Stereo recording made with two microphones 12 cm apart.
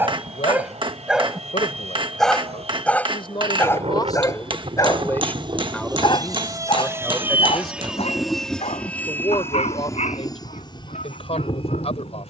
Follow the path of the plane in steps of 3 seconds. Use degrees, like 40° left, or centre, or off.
70° right, 50° right, 10° right, 30° left.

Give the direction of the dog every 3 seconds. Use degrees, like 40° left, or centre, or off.
centre, 20° left, 50° left, 60° left.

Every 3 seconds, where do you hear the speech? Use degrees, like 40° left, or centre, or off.
60° left, 30° left, centre, 40° left.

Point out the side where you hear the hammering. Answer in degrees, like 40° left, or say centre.
40° right.